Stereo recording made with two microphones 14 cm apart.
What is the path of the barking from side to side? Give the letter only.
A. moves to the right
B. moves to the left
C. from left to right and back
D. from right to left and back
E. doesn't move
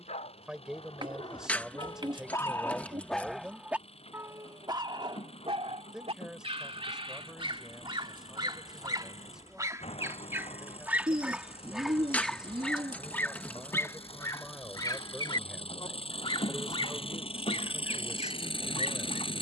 C.